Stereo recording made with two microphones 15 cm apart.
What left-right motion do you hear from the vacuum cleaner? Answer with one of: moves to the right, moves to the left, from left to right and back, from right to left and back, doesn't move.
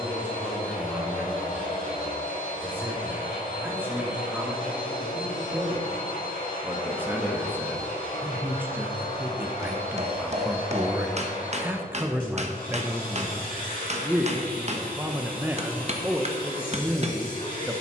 doesn't move.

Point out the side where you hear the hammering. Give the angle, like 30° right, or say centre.
50° right.